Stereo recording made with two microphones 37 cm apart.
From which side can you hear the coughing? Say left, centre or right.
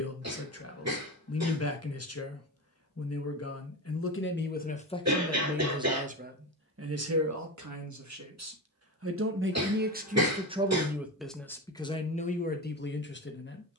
right.